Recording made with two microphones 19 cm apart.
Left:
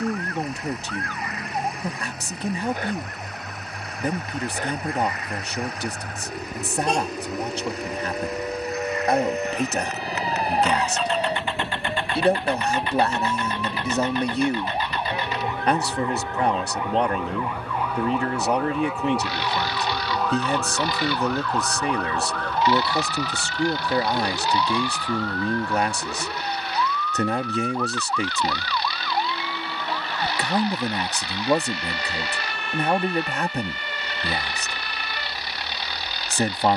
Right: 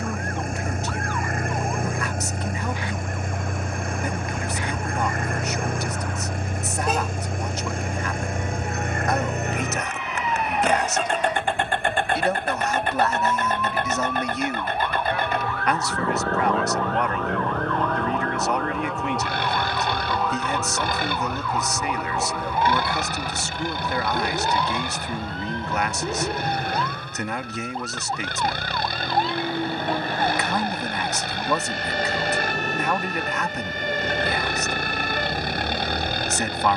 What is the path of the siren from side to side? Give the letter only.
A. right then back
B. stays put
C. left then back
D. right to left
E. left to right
E.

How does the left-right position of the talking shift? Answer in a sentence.
In this clip you hear the talking stay in one place.